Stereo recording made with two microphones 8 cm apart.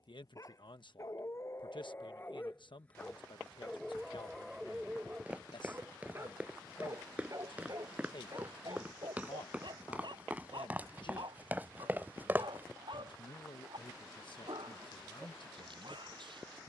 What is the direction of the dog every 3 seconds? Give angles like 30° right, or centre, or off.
30° left, 10° right, 40° right, 60° right, 70° right, 70° right.